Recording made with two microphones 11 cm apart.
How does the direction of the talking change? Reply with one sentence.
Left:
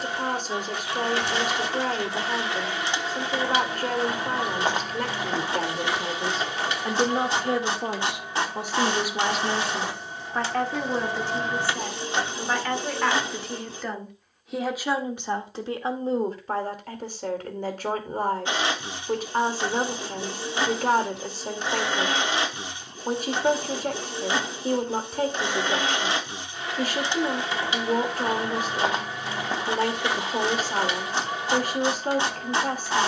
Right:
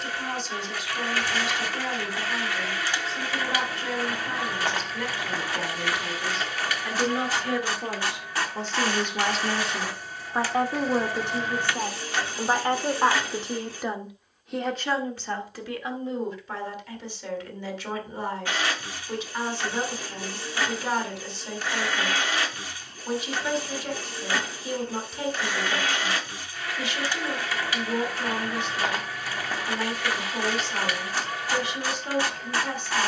In this clip you hear the talking go right and come back.